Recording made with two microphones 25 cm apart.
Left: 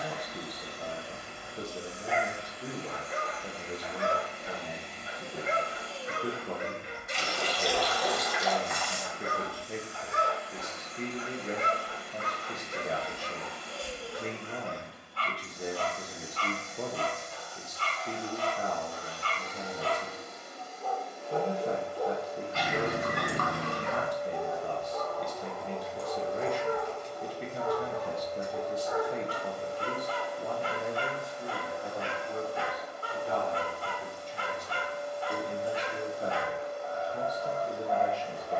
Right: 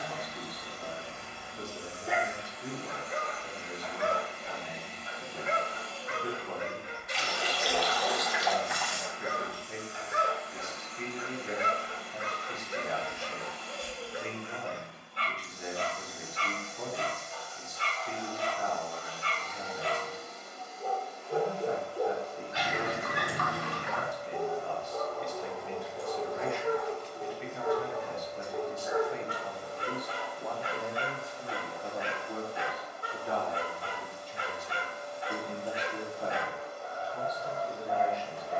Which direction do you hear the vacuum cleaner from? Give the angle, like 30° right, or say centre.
70° left.